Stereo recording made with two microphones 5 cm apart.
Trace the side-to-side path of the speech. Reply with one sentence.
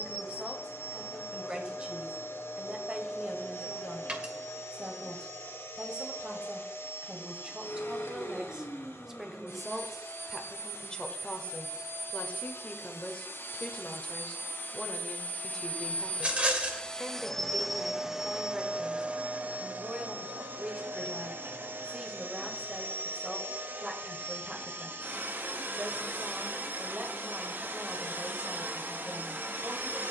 In this clip you hear the speech go left and come back.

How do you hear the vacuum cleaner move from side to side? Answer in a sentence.
You can hear the vacuum cleaner travel towards the right.